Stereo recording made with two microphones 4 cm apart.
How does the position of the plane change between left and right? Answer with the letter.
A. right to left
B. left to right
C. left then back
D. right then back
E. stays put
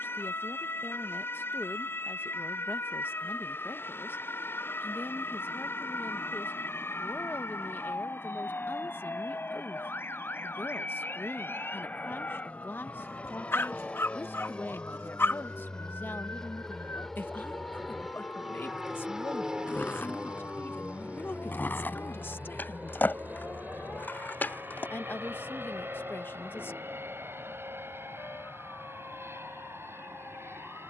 B.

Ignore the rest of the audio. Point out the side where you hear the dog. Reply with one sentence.
In this clip you hear the dog on the left.